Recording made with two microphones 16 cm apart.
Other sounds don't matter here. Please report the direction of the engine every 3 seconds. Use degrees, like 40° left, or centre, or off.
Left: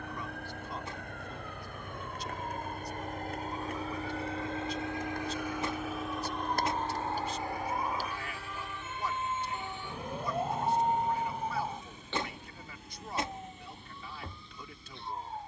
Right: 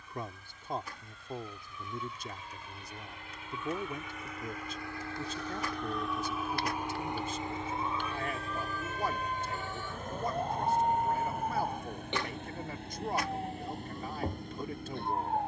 60° left, 30° left, 20° right, 50° right, 60° right.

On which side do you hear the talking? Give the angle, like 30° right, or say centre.
50° right.